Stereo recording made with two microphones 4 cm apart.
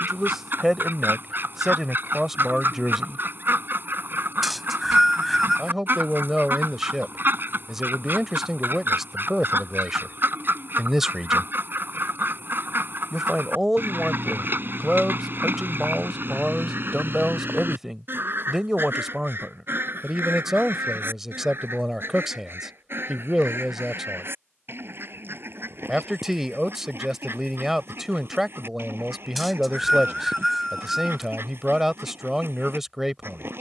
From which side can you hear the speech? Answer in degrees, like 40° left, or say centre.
10° right.